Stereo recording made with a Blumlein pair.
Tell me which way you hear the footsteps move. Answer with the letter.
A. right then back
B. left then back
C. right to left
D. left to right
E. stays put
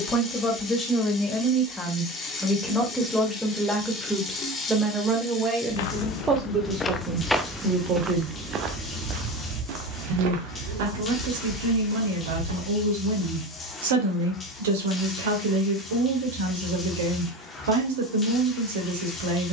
D.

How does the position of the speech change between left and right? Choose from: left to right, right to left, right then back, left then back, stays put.
left to right.